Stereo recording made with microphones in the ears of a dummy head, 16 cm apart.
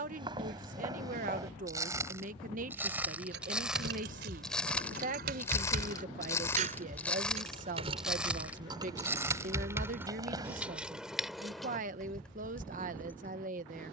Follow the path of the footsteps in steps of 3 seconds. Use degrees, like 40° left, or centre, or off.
20° right, centre, centre, 20° right, off.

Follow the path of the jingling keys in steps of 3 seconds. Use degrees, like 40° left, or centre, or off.
off, 60° right, 30° right, 10° right, 10° left.